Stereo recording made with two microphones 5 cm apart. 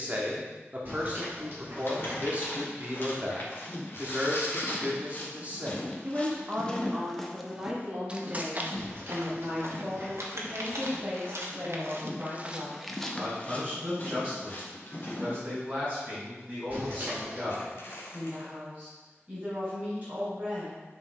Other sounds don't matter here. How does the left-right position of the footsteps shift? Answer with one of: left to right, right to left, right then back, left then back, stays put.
right then back.